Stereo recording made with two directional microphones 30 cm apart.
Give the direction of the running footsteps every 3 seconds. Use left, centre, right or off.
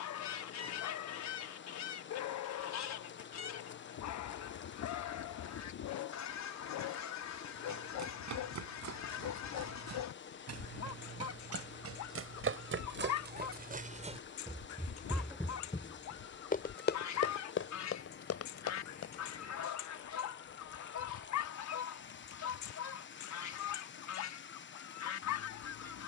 off, off, right, right, right, left, left, off, off.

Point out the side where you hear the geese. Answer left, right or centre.
left.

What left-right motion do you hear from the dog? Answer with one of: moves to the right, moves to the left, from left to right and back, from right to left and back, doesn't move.
doesn't move.